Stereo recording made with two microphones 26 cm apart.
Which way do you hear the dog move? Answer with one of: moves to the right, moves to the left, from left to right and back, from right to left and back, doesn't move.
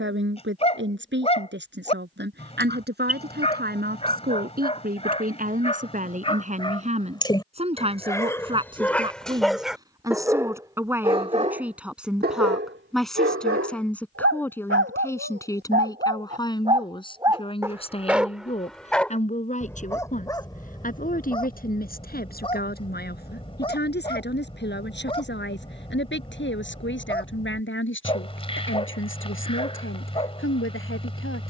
from left to right and back.